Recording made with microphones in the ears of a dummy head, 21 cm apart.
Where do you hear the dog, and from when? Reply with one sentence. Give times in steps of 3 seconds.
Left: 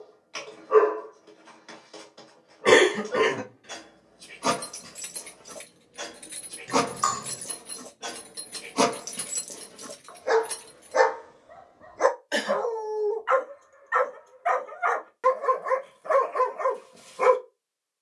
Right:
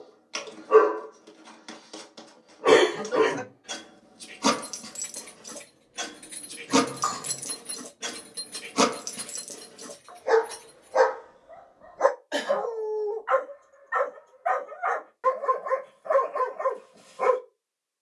You can hear the dog on the right from 0 s, in the centre from 9 s and on the left from 12 s.